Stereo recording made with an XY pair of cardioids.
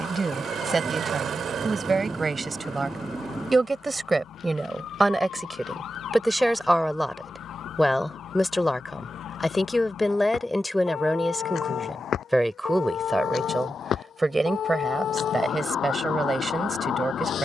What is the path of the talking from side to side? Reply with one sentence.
You can hear the talking move from right to left and back again.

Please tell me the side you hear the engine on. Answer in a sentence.
In this clip you hear the engine on the right.